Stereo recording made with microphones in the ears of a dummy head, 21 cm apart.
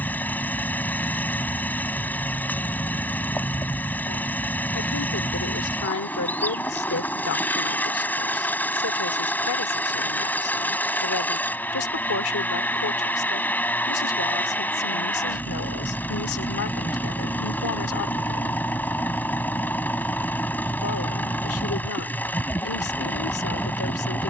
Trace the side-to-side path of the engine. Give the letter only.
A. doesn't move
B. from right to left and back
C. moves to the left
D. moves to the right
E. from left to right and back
A.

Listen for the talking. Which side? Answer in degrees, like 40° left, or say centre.
60° left.